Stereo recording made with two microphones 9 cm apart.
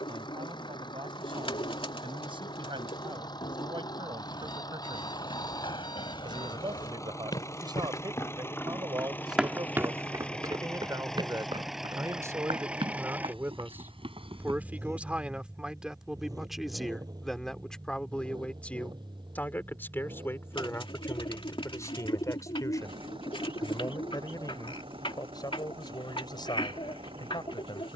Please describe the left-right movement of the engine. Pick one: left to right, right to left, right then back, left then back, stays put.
left to right.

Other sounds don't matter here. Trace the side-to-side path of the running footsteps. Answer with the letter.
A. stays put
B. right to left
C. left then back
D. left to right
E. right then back
D.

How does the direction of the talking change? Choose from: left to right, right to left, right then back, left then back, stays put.
right to left.